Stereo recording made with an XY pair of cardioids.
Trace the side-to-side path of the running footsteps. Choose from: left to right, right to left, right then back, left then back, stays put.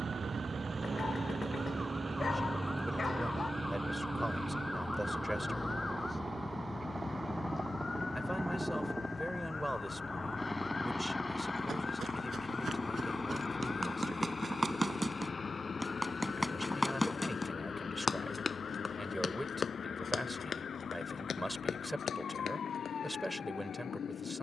right to left.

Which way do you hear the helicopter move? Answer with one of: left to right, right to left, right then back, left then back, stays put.
right to left.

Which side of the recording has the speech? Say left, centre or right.
centre.